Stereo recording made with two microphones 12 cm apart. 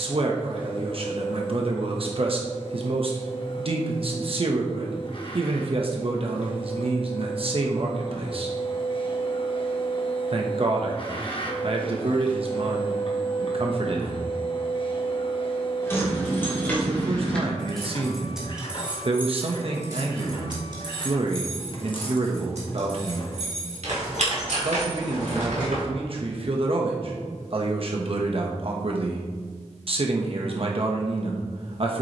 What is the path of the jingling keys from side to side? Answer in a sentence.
You can hear the jingling keys go from the left side to the right.